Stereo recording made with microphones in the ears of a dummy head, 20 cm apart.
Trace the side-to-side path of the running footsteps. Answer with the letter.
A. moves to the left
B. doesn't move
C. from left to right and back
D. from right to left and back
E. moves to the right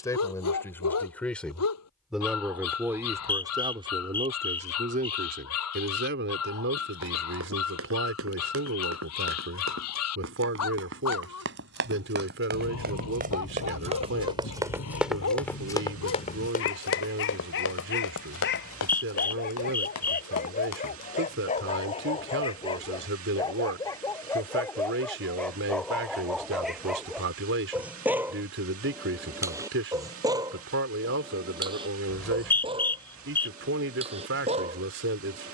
A.